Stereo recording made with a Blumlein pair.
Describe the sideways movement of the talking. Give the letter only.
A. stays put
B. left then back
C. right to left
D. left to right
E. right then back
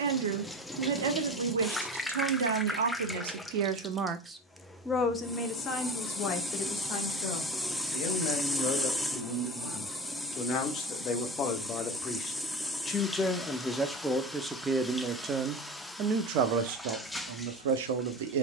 B.